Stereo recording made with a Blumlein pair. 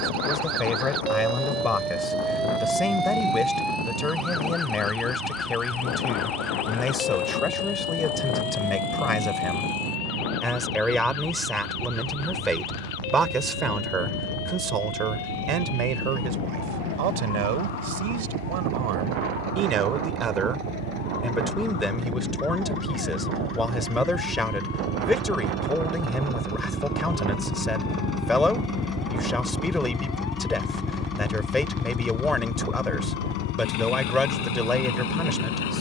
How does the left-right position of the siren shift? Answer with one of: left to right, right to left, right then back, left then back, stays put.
right to left.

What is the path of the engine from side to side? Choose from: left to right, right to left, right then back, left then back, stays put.
right to left.